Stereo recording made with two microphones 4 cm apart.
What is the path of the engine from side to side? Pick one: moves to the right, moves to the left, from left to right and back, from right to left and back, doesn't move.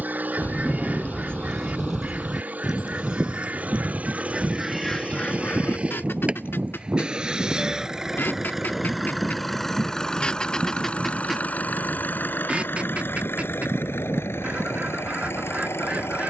moves to the left.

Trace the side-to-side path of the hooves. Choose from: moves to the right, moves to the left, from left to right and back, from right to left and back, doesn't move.
moves to the right.